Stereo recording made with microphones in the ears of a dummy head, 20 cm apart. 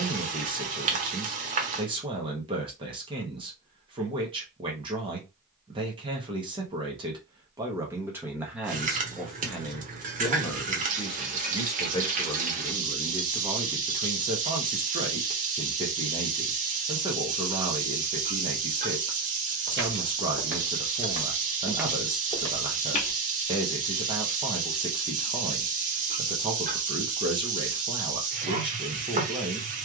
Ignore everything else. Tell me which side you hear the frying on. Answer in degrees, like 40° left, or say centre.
30° right.